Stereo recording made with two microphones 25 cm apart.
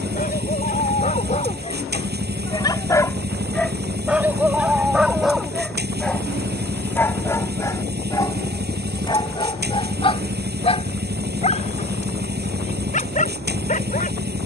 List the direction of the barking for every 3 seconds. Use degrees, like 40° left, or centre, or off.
30° left, centre, 10° left, 20° left, 30° left.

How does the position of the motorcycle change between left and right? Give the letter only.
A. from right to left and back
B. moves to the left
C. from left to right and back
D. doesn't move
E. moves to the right
D.